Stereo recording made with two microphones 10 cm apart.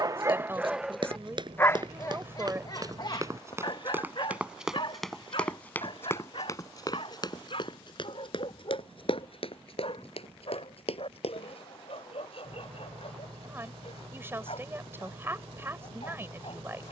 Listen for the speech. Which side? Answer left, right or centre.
right.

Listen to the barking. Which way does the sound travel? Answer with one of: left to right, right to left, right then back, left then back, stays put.
right to left.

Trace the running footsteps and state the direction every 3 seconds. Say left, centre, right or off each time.
right, centre, left, left, off, off.